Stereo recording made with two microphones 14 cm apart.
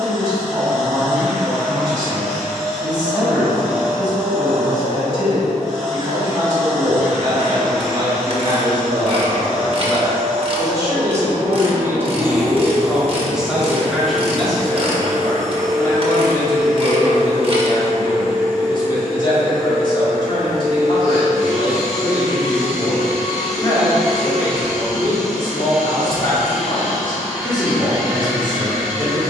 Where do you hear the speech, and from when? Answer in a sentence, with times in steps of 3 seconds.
You can hear the speech on the right from 0 s, in the centre from 12 s and on the left from 15 s.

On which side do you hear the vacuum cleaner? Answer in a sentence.
In this clip you hear the vacuum cleaner in the centre.